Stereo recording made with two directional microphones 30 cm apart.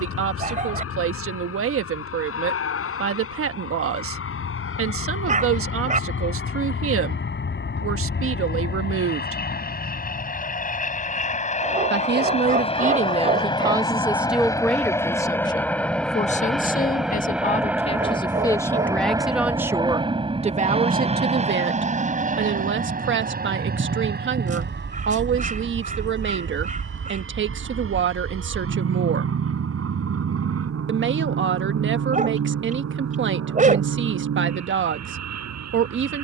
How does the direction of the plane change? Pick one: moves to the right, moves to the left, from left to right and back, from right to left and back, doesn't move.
moves to the right.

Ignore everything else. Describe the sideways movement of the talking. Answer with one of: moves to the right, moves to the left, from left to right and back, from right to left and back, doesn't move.
from right to left and back.